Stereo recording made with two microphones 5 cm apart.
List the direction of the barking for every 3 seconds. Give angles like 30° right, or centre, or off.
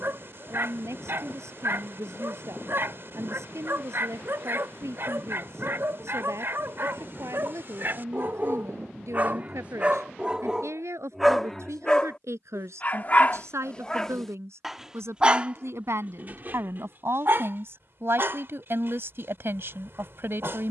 50° right, 50° right, 50° right, 10° right, 20° left, 40° right, 50° right.